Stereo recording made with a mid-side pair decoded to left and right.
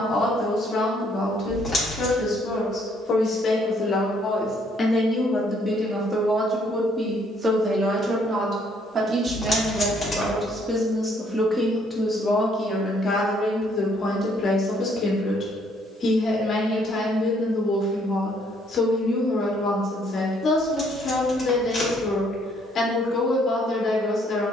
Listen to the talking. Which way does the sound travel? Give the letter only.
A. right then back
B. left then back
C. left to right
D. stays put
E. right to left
A.